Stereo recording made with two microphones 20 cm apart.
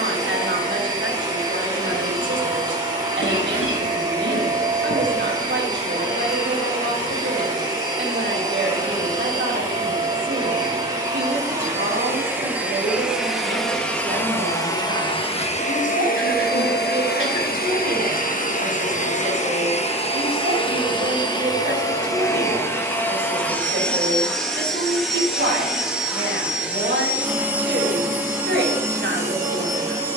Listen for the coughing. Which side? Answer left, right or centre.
left.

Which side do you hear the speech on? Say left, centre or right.
right.